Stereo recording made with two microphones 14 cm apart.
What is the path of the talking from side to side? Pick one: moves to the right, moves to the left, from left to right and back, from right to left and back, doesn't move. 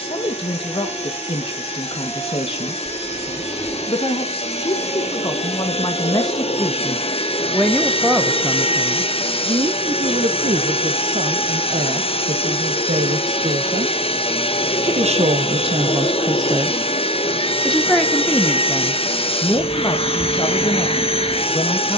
from left to right and back.